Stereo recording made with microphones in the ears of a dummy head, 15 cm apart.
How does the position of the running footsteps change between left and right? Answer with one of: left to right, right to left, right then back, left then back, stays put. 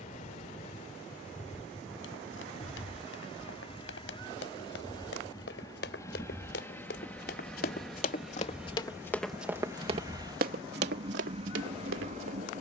left to right.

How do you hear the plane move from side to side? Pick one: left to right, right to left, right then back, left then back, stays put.
left to right.